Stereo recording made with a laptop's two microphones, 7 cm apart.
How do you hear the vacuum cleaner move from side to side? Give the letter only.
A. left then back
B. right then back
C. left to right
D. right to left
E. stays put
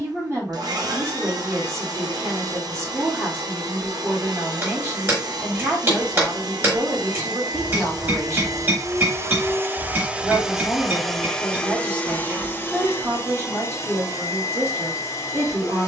D.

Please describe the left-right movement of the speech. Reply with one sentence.
In this clip you hear the speech stay put.